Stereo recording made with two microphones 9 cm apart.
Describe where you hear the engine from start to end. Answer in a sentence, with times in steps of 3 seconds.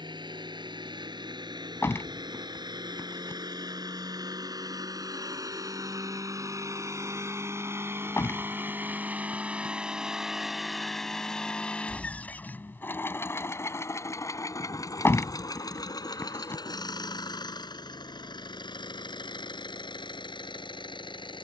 In this clip you hear the engine on the right from 0 s, in the centre from 9 s and on the left from 12 s.